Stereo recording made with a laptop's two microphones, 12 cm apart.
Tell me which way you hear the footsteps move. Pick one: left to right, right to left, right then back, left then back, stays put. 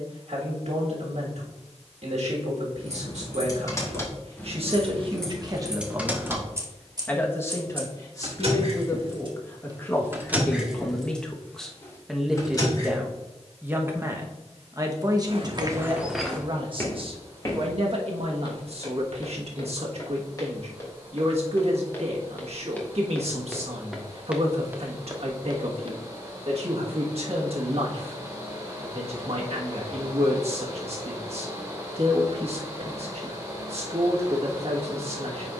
left then back.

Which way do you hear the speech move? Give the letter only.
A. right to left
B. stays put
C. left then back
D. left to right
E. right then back
C.